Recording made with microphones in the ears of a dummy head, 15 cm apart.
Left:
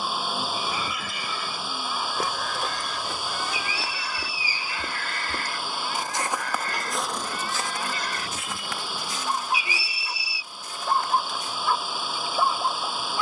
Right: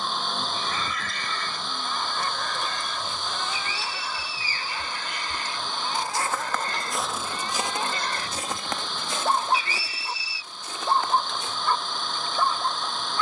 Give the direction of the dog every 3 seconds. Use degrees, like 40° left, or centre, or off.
10° left, 10° right, 30° right, 20° right, 10° left.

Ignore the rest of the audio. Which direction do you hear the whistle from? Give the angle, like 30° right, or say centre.
10° left.